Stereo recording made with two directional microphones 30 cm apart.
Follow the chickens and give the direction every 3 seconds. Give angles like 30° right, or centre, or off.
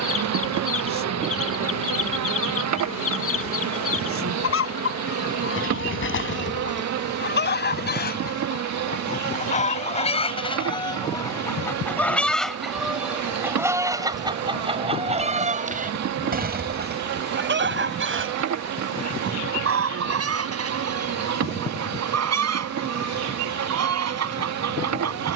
50° left, 50° left, 40° left, 20° left, 10° right, 30° right, 50° right, 60° right, 60° right.